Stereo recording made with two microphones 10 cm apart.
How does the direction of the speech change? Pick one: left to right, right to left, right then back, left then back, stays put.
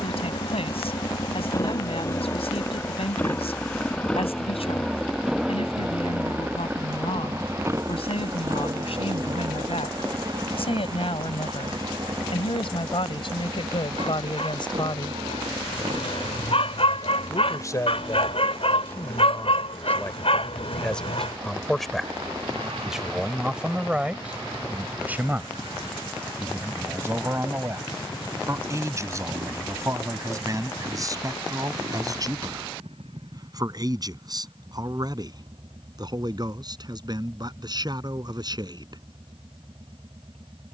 left to right.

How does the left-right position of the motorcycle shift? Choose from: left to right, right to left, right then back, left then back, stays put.
left to right.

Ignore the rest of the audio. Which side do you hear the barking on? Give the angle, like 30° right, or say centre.
80° left.